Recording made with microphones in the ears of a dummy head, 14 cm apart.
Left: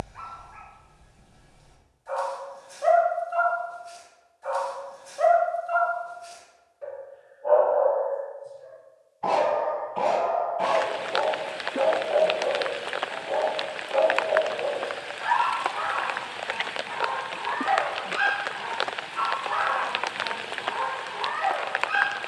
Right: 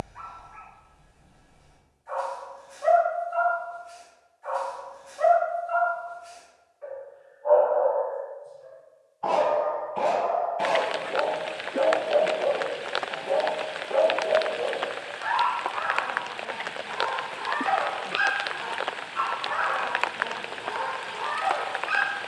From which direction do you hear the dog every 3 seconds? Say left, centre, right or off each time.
left, left, left, centre, right, right, right, right.